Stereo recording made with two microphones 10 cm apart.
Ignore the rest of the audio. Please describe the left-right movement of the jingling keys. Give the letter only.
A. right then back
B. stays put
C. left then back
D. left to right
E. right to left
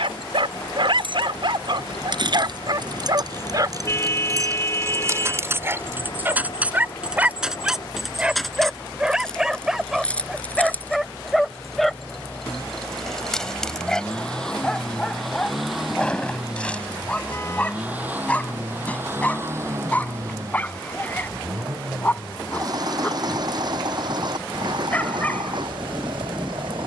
E.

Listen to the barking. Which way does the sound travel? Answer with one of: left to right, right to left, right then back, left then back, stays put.
right to left.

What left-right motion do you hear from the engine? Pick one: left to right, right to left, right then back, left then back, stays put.
left to right.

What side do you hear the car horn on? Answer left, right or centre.
left.